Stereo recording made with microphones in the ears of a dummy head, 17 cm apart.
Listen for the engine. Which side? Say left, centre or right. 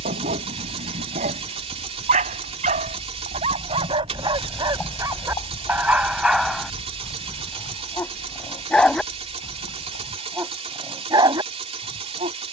right.